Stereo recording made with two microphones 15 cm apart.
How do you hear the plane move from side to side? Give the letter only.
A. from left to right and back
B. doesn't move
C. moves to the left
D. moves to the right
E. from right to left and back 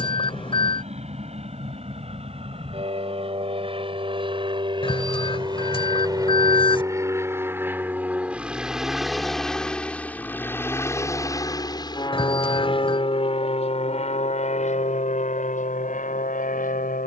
C.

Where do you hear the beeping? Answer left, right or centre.
left.